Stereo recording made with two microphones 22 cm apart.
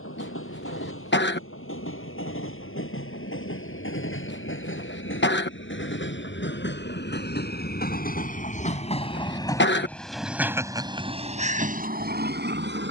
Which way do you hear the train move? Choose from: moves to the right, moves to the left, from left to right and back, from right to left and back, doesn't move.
moves to the right.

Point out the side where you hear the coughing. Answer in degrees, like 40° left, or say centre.
50° left.